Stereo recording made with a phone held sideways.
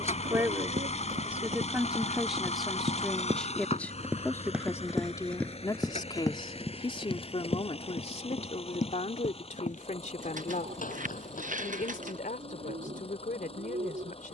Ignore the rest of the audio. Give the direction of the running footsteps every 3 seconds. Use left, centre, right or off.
right, centre, left, left, off.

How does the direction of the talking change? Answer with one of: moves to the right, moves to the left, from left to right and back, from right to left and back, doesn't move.
moves to the left.